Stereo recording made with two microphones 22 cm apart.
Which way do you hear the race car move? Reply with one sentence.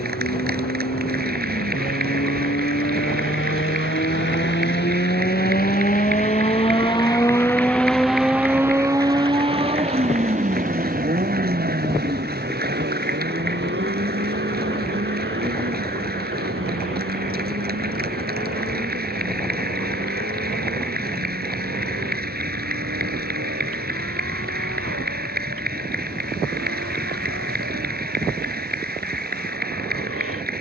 You can hear the race car move to the right.